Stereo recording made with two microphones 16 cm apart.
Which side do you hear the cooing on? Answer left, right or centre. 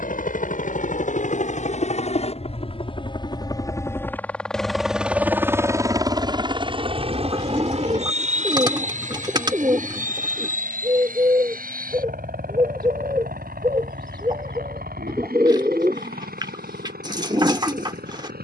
right.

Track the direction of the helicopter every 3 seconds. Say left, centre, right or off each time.
left, centre, right, right, right, right.